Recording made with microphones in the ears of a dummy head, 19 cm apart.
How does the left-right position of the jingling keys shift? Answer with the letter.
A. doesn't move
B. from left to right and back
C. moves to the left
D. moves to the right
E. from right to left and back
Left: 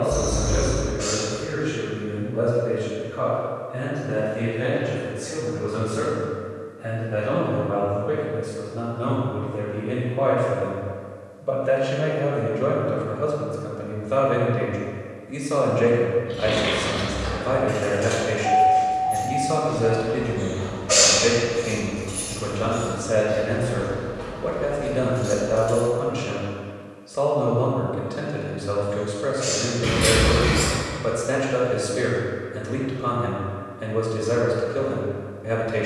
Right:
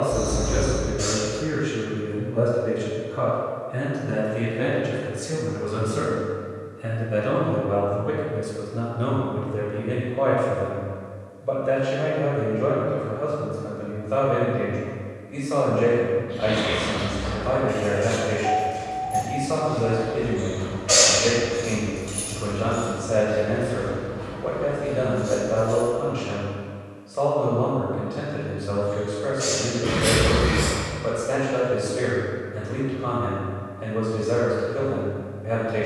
B.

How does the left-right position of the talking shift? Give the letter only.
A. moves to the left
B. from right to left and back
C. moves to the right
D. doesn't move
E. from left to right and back
A.